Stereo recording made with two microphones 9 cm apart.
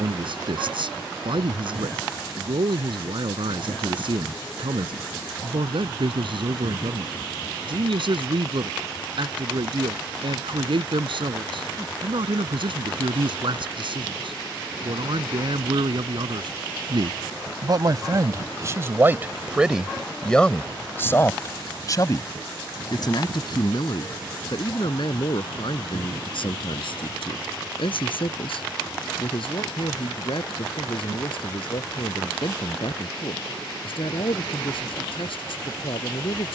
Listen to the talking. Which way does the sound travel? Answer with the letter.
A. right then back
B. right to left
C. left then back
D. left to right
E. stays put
B.